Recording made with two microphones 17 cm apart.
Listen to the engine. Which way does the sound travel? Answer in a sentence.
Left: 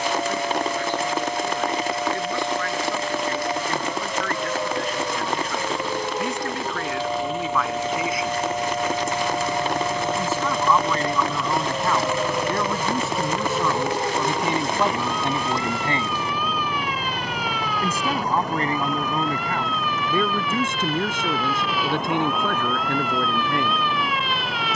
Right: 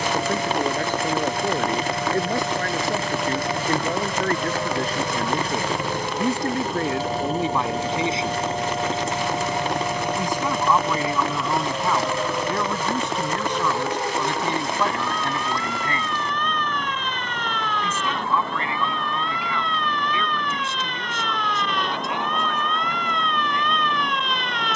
In this clip you hear the engine move to the left.